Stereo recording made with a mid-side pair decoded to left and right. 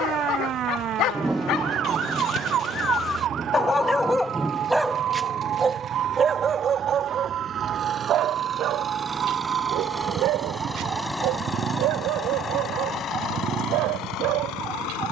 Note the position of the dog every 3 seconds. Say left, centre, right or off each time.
left, centre, right, right, right.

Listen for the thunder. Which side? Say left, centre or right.
centre.